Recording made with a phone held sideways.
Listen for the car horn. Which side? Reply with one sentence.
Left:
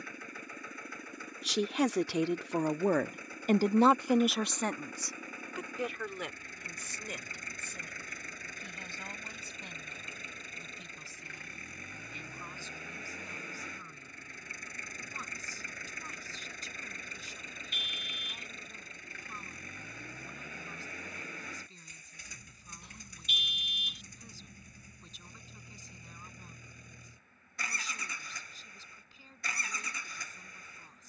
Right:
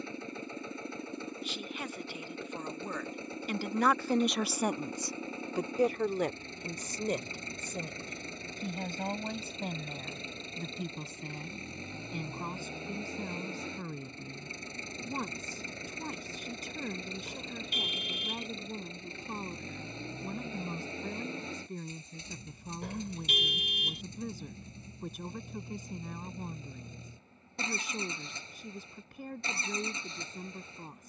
You can hear the car horn on the right.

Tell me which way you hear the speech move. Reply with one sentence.
You can hear the speech move to the right.